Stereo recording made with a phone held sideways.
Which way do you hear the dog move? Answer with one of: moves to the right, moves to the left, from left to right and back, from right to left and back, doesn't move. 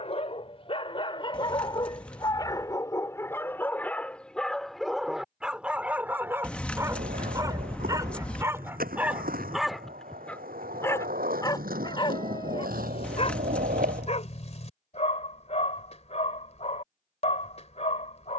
from left to right and back.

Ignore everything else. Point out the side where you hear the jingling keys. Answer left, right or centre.
centre.